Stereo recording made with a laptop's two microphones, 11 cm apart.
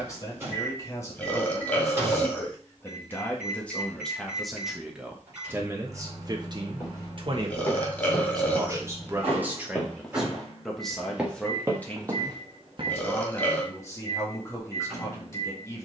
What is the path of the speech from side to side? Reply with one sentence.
You can hear the speech go right and come back.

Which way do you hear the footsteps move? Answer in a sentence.
In this clip you hear the footsteps move to the right.